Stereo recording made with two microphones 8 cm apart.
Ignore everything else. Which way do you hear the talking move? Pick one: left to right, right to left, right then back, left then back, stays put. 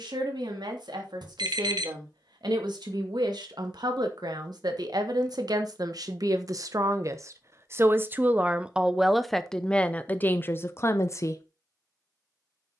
right to left.